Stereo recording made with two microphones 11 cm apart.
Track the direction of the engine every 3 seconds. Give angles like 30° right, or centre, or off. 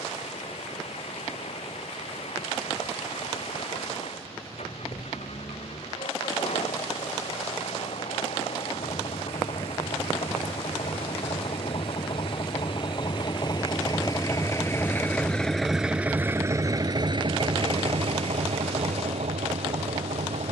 70° left, 70° left, 70° left, 60° left, 40° left, 20° right, 70° right.